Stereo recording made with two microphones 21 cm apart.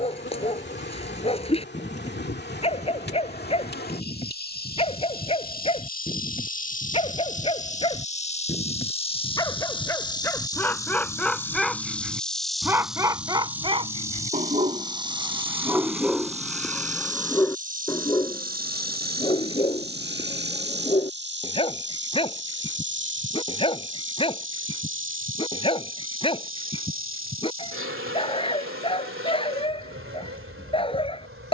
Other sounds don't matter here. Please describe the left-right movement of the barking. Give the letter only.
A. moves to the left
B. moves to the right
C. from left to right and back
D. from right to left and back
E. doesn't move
C.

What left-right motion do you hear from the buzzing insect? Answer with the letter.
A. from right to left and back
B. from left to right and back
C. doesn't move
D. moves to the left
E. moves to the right
E.